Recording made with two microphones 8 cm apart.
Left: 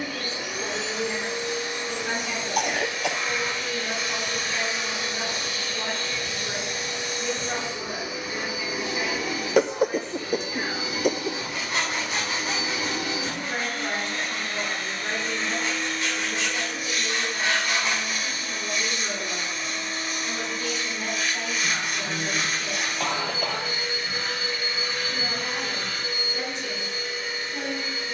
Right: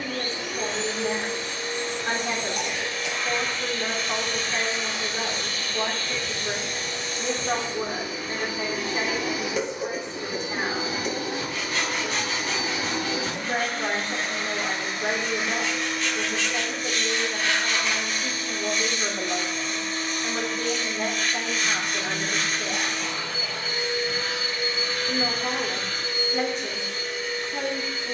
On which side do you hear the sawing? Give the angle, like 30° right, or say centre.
20° left.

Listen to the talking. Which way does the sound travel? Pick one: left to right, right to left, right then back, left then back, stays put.
stays put.